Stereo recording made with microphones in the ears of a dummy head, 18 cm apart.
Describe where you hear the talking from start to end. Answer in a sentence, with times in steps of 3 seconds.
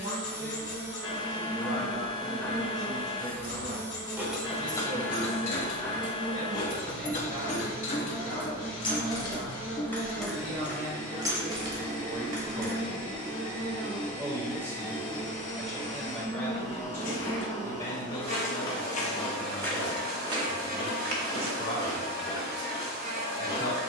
You can hear the talking on the right from 0 s, in the centre from 15 s and on the left from 18 s.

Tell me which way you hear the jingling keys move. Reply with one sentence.
In this clip you hear the jingling keys move from right to left and back again.